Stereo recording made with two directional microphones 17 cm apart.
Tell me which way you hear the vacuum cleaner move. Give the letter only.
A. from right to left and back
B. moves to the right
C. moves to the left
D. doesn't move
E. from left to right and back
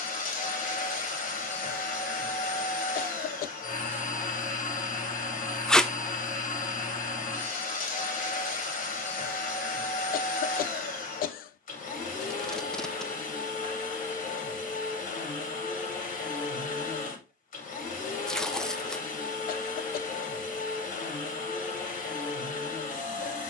D.